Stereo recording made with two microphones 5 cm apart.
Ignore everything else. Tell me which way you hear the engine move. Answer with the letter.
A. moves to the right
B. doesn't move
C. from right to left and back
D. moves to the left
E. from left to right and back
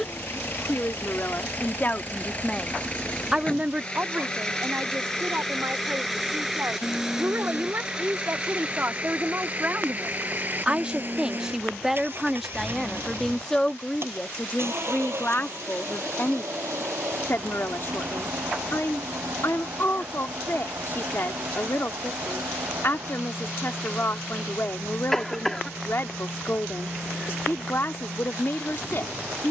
A.